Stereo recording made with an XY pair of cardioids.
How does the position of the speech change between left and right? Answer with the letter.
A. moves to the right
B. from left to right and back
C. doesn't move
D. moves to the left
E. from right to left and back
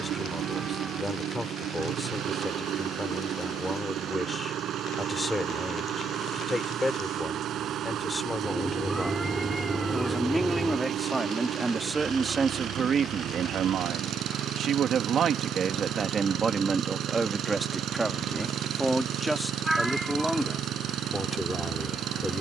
B.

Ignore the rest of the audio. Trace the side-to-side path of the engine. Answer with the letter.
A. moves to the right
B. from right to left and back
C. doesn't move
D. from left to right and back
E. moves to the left
C.